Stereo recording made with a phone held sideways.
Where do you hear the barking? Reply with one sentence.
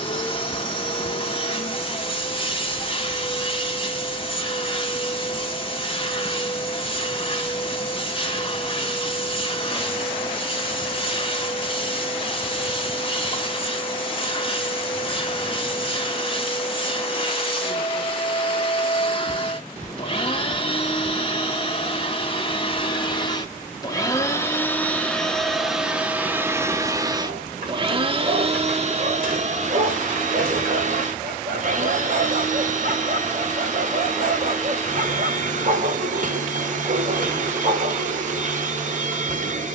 In this clip you hear the barking on the right.